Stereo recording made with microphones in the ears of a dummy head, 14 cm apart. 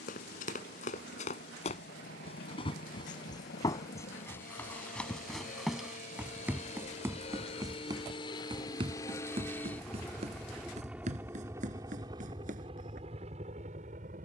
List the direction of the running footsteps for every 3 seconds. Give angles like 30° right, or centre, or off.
40° left, 10° left, 20° right, 40° right, 50° right.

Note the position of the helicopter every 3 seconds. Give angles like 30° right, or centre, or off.
60° left, 50° left, 40° left, centre, 30° right.